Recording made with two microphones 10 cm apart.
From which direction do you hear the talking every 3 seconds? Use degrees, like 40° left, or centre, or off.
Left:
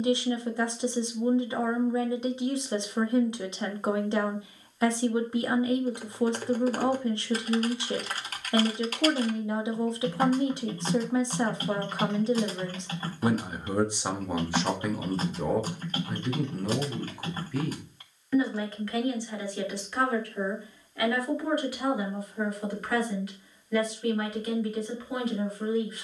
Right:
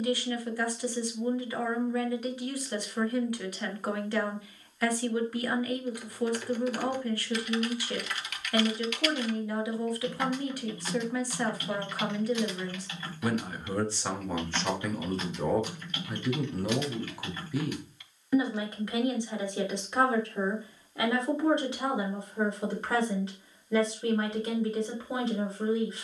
20° left, 20° left, 20° left, 20° left, 20° left, centre, 20° right, 30° right, 30° right.